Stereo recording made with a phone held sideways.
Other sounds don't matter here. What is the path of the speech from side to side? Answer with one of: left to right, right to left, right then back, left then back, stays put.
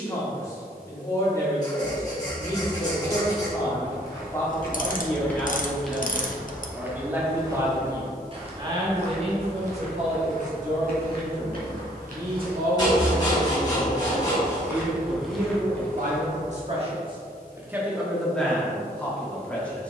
right then back.